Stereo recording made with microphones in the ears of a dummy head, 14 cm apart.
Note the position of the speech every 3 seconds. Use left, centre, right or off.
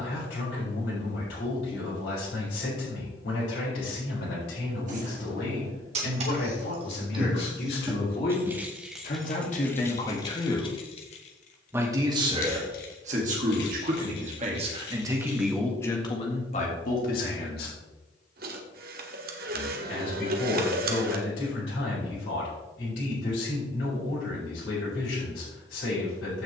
left, left, left, left, right, left, left, left, left.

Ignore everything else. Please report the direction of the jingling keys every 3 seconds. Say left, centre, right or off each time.
off, right, right, left, left, left, off, off, off.